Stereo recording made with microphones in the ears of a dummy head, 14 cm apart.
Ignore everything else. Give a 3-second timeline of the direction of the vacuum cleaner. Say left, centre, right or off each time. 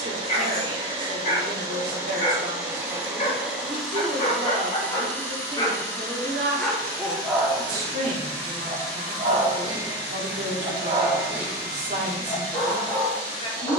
right, centre, left, left, left.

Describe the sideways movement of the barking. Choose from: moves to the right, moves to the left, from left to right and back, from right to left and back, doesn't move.
from left to right and back.